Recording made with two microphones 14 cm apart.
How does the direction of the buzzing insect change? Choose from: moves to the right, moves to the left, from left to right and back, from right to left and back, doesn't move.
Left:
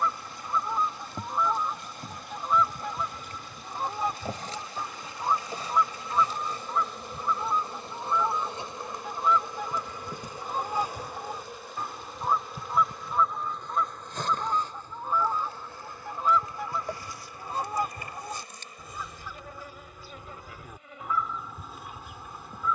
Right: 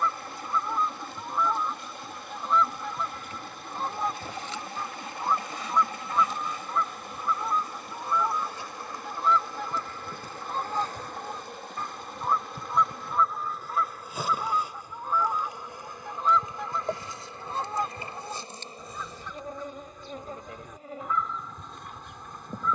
moves to the right.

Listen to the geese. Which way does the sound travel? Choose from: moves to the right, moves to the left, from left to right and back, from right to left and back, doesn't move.
doesn't move.